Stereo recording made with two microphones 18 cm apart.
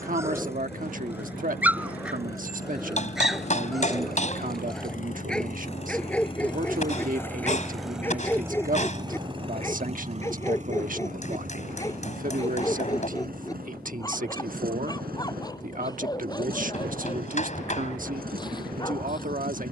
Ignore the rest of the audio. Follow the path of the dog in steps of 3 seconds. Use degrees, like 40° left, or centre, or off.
10° right, centre, 10° left, 10° left, 20° left, 20° left, 20° left.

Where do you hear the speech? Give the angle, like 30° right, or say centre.
50° right.